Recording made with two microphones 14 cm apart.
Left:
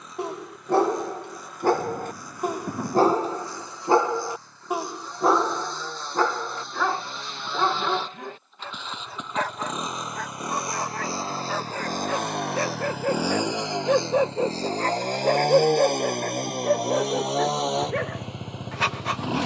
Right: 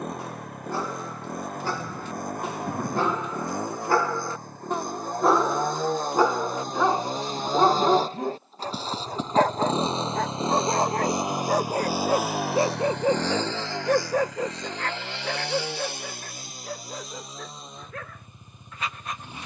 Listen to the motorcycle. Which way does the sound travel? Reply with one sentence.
You can hear the motorcycle move from right to left.